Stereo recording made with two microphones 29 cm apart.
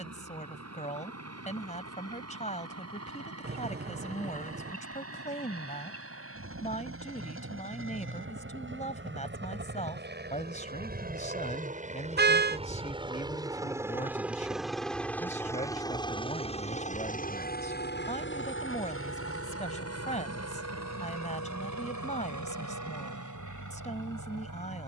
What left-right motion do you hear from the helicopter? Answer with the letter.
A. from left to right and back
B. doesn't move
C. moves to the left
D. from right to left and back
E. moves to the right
C.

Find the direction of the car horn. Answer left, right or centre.
right.